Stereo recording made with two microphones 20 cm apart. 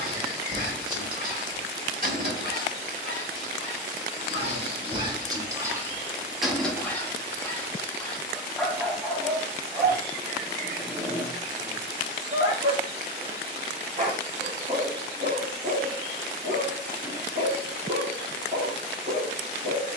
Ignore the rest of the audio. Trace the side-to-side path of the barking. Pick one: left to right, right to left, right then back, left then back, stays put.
left then back.